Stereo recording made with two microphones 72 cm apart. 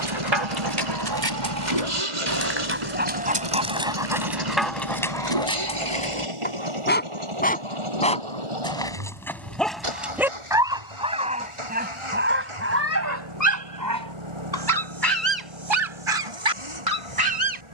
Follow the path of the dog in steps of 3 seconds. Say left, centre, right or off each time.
right, centre, centre, centre, right, right.